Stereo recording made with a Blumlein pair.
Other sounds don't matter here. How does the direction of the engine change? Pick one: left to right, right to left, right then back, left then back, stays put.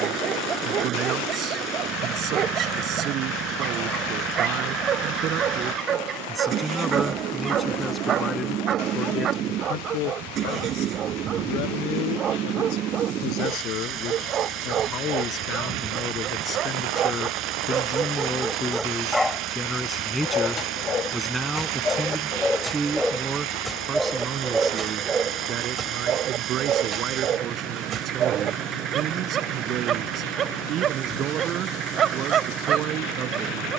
stays put.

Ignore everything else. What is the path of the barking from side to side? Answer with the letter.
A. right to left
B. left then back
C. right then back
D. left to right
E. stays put
B.